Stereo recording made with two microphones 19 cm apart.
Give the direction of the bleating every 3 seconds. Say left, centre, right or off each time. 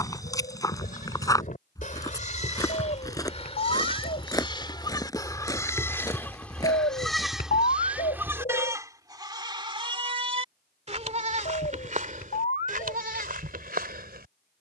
left, left, centre, right, right.